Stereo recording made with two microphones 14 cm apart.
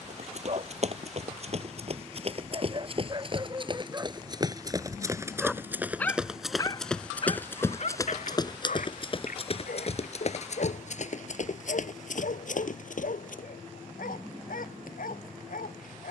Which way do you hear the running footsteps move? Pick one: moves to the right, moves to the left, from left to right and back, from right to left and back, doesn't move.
moves to the left.